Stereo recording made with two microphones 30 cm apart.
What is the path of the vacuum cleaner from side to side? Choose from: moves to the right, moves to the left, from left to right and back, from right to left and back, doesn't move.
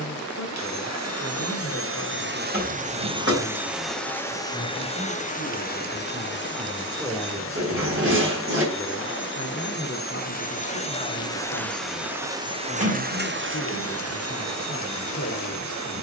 from right to left and back.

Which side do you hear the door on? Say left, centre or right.
right.